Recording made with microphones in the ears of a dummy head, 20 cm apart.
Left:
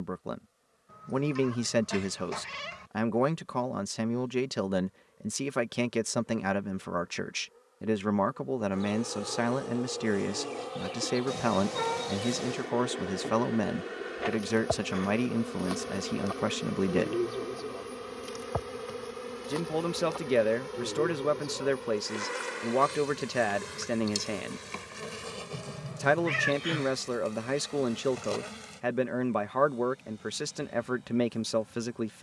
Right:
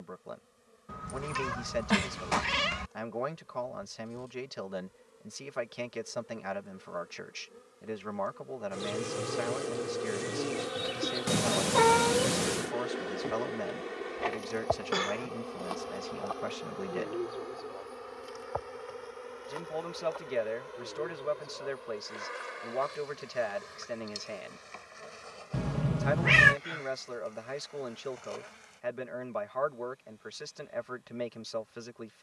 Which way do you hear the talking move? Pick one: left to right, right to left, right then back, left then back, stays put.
stays put.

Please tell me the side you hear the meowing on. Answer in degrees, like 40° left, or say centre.
60° right.